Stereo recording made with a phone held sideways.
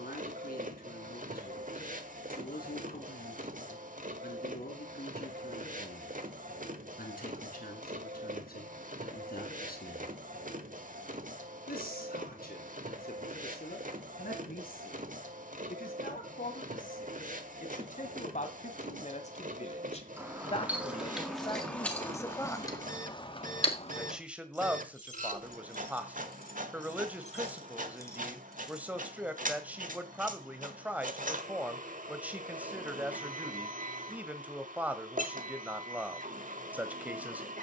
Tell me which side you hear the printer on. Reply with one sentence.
You can hear the printer on the right.